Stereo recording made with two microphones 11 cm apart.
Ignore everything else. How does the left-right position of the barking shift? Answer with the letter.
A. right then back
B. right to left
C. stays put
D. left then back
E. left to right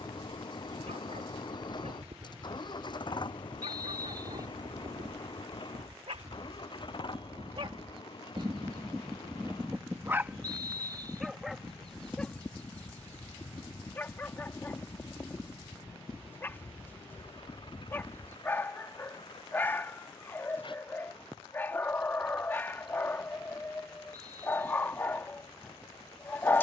B.